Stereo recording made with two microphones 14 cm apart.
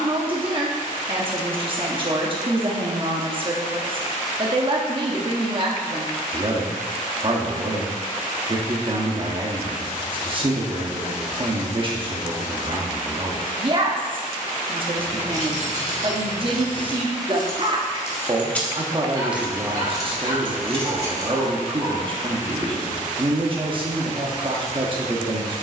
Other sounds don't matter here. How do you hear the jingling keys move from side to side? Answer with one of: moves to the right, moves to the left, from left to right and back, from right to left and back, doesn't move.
moves to the right.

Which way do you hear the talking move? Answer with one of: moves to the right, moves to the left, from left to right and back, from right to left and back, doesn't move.
doesn't move.